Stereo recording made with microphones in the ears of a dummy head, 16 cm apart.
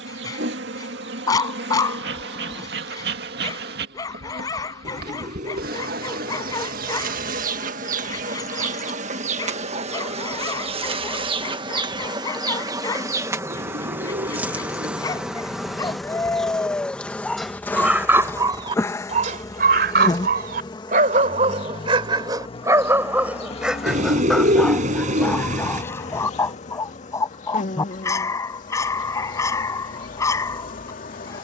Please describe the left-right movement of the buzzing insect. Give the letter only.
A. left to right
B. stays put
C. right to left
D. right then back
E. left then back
C.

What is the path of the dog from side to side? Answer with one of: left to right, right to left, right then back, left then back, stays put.
right then back.